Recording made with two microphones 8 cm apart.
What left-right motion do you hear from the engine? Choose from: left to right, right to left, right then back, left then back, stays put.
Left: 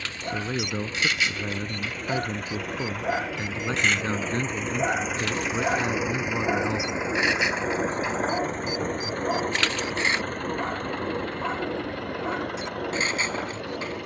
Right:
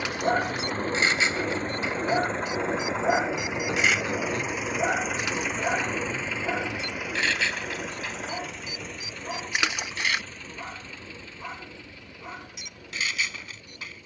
right to left.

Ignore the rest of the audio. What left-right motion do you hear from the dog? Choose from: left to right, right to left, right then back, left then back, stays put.
right to left.